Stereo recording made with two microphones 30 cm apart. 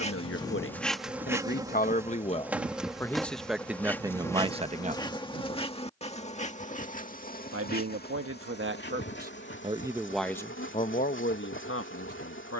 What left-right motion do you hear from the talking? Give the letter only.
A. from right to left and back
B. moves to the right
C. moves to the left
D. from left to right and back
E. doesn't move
D.